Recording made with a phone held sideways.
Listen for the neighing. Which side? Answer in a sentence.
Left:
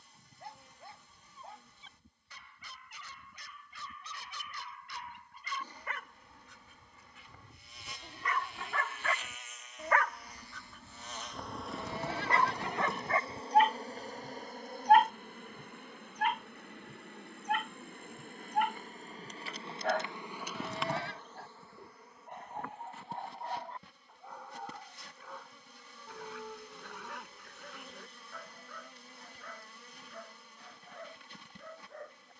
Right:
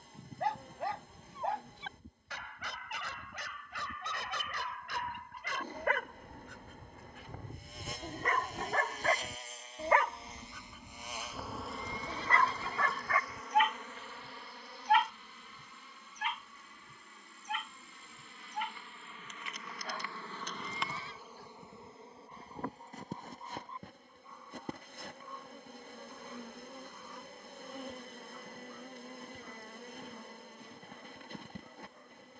In this clip you hear the neighing on the left.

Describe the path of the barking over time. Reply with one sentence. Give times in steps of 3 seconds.
In this clip you hear the barking on the right from 0 s, in the centre from 9 s and on the left from 12 s.